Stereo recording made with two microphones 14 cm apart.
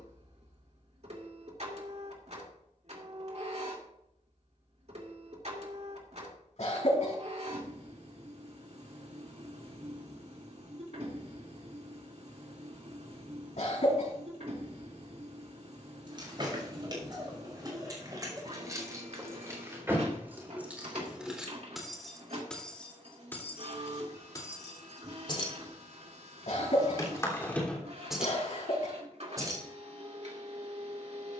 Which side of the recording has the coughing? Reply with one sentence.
You can hear the coughing on the left.